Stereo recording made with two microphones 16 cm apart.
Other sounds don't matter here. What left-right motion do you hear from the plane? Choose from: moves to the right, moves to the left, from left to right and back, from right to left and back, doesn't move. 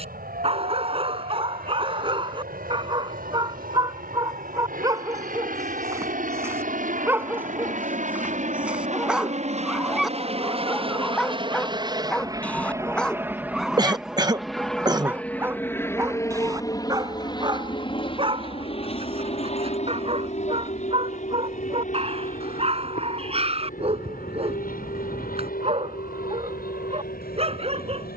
moves to the left.